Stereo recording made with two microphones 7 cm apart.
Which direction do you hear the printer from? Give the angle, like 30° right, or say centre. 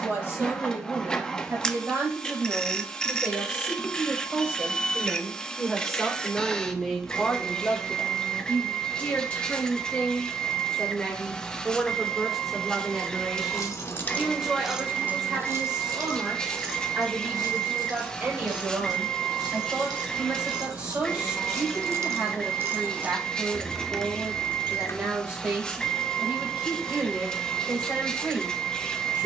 10° left.